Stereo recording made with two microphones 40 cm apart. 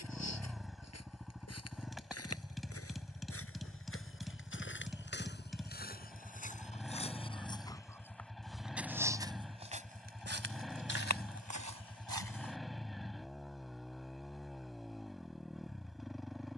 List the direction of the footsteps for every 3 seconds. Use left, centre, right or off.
left, left, centre, right, right, off.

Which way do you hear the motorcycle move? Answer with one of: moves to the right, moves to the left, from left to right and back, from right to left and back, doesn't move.
doesn't move.